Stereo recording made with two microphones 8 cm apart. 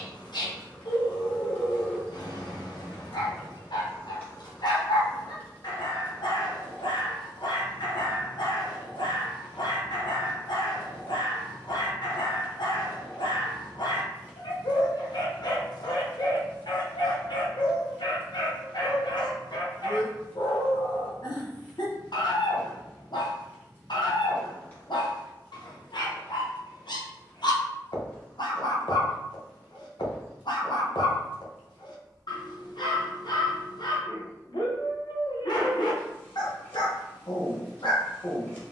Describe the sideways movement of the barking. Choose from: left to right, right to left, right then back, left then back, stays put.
stays put.